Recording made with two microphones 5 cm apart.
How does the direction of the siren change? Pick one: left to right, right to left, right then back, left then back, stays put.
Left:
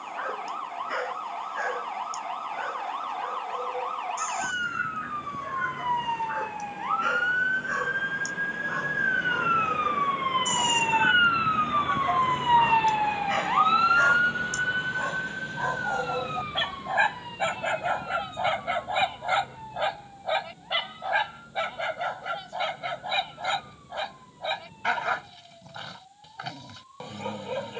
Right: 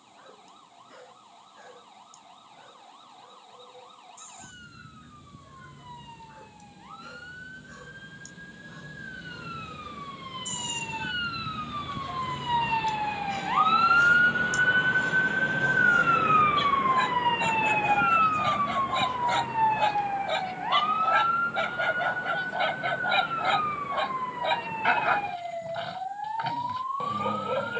left to right.